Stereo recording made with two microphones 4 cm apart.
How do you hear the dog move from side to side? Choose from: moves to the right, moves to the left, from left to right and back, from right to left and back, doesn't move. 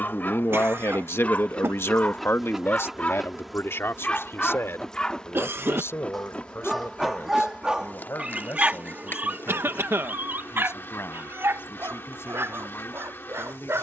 moves to the right.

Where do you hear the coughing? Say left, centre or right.
right.